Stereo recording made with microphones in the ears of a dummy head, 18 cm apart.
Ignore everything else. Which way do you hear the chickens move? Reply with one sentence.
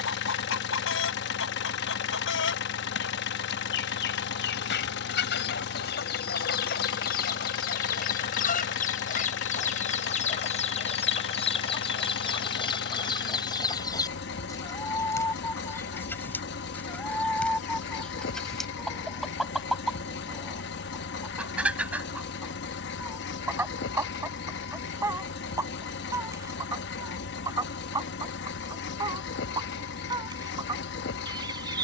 In this clip you hear the chickens travel towards the right.